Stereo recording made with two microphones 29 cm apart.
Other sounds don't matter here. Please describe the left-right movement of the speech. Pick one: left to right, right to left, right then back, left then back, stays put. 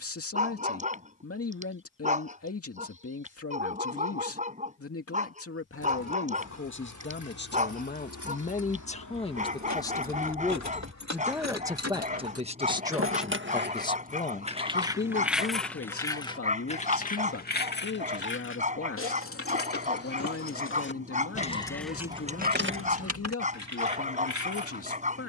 right then back.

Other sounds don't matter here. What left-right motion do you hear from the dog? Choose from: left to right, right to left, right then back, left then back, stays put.
stays put.